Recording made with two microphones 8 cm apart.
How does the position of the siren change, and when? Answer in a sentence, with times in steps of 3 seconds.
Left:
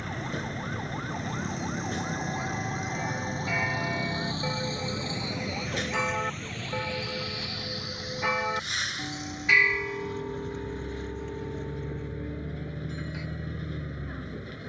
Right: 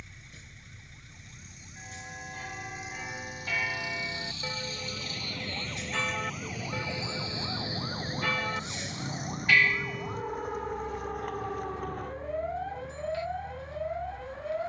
You can hear the siren on the left from 0 s and on the right from 6 s.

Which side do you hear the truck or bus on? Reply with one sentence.
In this clip you hear the truck or bus on the left.